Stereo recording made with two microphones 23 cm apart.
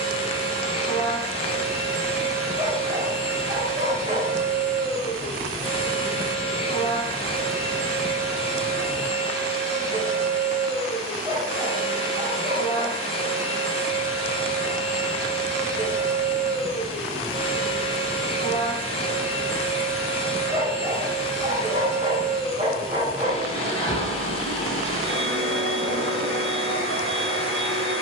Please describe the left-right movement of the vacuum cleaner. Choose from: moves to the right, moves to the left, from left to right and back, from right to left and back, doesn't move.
doesn't move.